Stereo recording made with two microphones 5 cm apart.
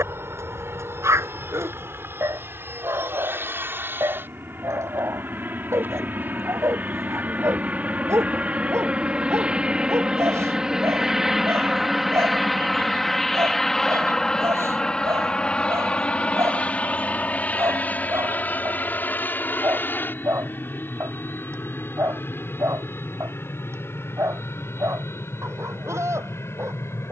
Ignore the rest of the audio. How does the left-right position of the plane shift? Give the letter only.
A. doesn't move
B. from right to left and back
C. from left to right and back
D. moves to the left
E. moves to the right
D.